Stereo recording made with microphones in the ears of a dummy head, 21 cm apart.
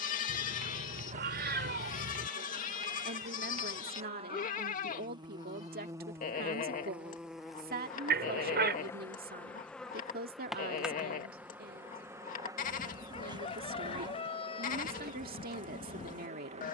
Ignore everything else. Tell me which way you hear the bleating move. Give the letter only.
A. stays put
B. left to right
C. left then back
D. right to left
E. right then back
A.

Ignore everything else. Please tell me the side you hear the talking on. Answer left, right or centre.
right.